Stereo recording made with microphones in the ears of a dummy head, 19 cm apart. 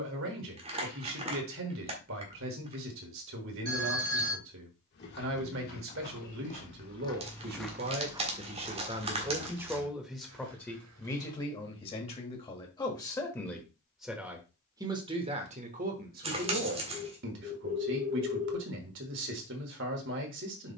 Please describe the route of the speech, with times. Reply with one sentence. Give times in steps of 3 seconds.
In this clip you hear the speech on the right from 0 s, in the centre from 9 s and on the right from 15 s.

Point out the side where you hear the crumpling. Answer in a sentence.
You can hear the crumpling on the right.